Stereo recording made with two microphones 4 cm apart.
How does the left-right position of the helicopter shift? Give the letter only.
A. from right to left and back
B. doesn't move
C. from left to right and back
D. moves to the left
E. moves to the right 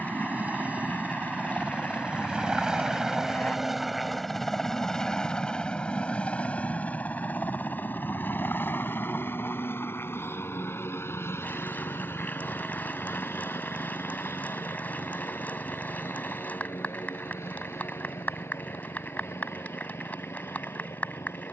D.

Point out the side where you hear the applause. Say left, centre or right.
left.